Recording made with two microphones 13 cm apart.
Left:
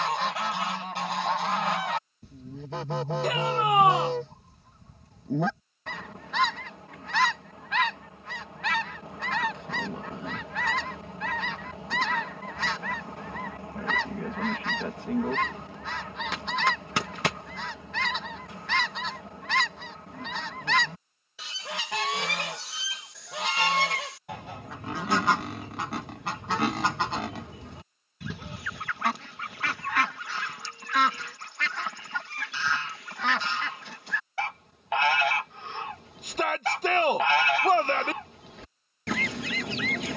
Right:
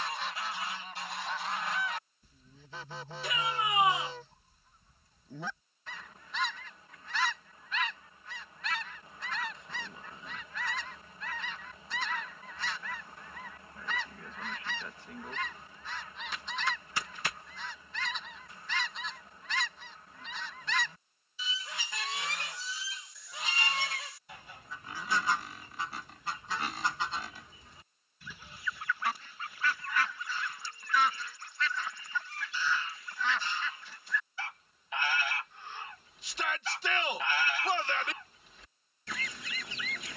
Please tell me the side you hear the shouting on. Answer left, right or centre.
left.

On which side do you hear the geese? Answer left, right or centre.
left.